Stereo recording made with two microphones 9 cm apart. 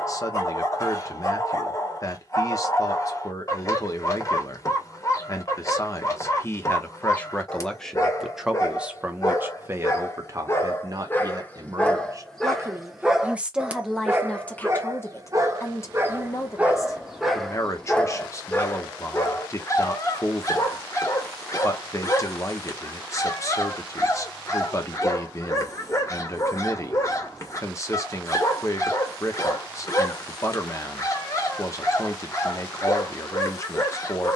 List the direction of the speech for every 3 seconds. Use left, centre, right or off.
left, left, centre, right, centre, left, left, left, left, left, left, left.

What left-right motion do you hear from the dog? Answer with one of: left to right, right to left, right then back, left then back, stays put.
right then back.